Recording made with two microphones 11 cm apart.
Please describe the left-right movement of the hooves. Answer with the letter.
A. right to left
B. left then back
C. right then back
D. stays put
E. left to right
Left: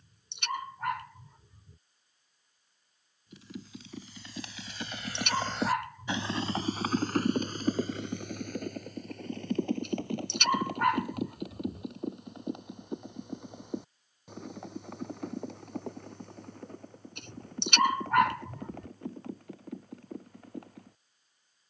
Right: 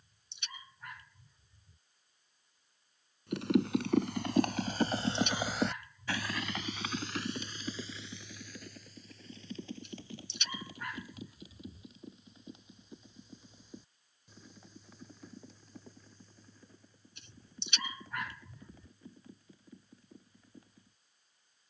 A.